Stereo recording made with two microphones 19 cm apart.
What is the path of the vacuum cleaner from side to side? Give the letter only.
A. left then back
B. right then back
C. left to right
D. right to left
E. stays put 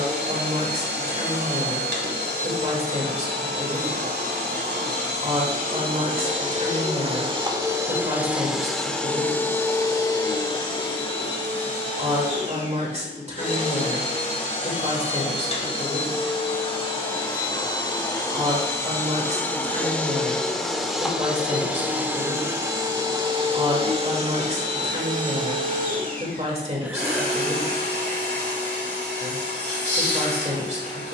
A.